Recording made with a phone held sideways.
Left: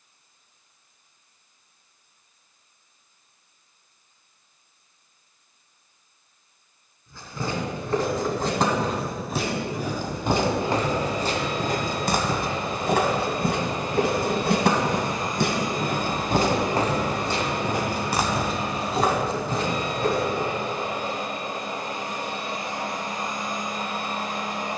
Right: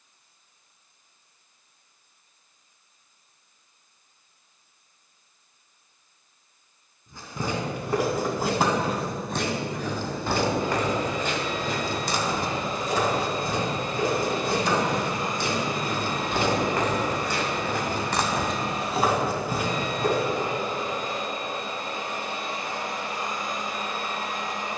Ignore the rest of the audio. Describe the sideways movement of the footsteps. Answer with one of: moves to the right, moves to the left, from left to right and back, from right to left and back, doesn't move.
from right to left and back.